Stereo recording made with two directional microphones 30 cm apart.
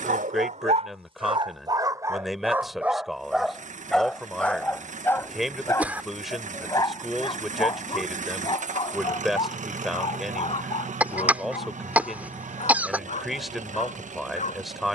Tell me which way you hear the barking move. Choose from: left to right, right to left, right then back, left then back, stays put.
right to left.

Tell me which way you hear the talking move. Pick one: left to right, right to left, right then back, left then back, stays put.
stays put.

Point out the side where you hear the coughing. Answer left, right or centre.
centre.